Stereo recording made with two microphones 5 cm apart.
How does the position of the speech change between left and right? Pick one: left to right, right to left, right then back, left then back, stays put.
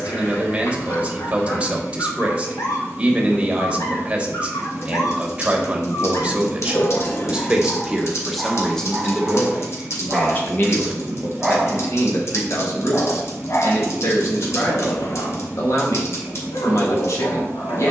right to left.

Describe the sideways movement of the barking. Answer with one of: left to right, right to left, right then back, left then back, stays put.
right then back.